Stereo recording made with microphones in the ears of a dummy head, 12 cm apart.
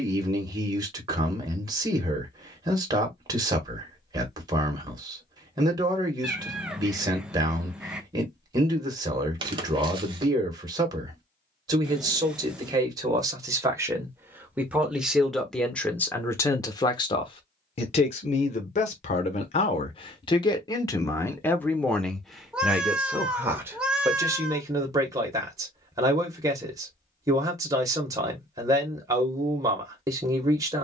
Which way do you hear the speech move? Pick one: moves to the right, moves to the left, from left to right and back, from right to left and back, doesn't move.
from right to left and back.